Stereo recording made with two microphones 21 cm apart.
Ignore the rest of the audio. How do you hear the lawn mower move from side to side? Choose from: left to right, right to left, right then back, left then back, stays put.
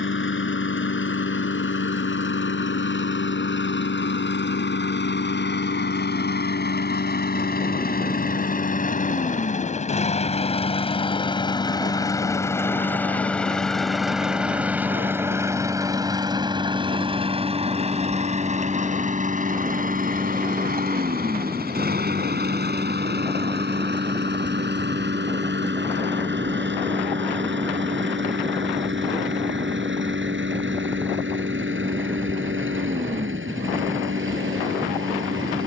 left to right.